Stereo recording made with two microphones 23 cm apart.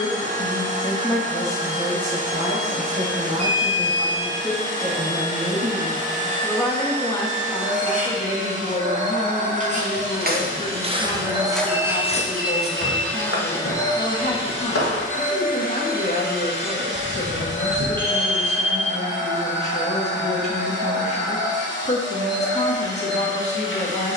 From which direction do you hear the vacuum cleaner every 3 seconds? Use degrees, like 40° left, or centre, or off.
30° right, 30° right, 30° right, 20° right, 10° left, 40° left, 50° left, 50° left.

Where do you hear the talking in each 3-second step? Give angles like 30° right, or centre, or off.
centre, 10° right, 20° left, 30° left, 30° left, 30° left, 30° left, 30° left.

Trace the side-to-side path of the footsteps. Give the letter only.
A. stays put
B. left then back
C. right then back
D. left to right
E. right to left
E.